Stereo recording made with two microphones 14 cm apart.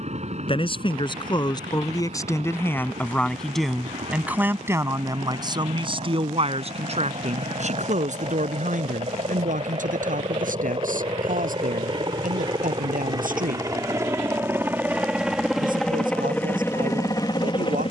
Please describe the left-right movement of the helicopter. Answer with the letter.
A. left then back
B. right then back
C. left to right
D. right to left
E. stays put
D.